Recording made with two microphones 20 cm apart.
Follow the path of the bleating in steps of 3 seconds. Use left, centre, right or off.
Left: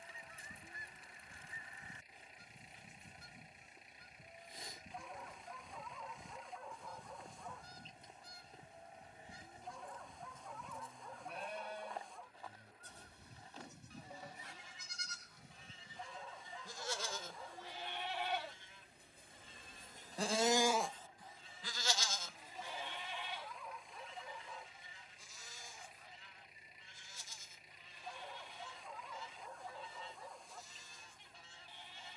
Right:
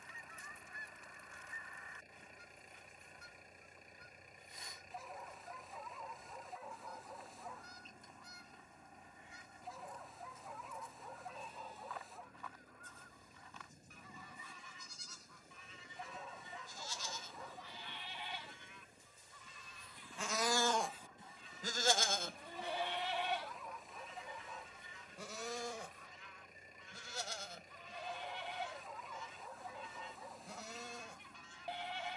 left, left, left, left, left, left, left, right, right, right, right.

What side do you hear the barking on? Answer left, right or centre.
centre.